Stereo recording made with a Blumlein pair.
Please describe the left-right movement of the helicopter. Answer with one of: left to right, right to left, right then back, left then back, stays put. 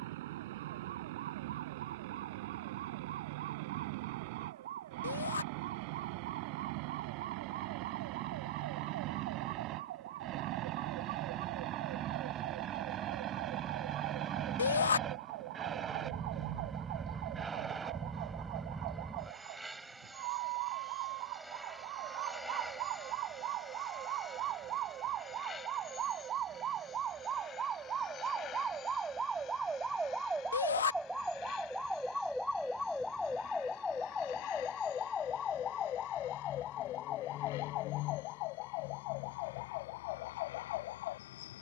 right to left.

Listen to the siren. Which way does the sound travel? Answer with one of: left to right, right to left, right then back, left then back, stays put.
right to left.